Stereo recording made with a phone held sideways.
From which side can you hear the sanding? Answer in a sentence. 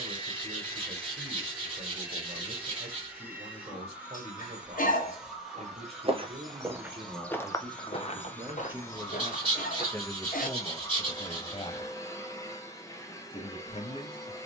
In this clip you hear the sanding on the right.